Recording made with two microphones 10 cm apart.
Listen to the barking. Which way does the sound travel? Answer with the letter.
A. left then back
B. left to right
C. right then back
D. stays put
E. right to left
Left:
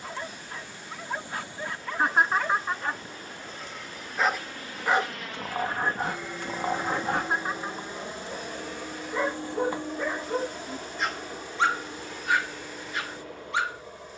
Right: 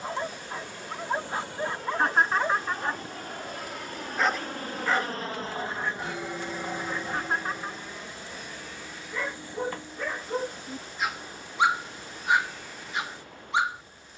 A.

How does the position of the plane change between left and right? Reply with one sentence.
In this clip you hear the plane move from right to left.